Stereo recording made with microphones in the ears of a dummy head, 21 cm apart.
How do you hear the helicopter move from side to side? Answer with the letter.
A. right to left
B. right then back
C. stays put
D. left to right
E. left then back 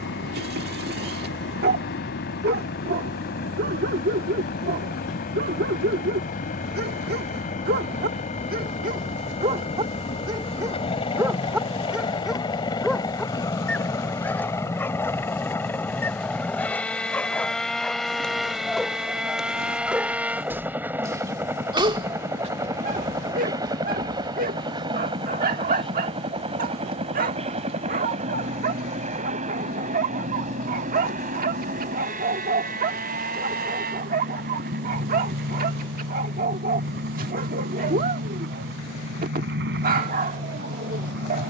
D.